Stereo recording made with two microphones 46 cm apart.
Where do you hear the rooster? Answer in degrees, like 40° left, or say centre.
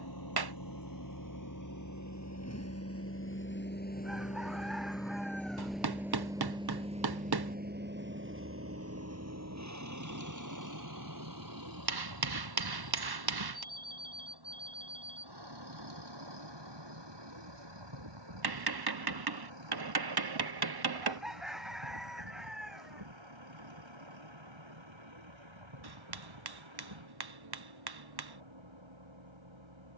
centre.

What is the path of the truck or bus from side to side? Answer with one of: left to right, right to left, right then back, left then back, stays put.
left to right.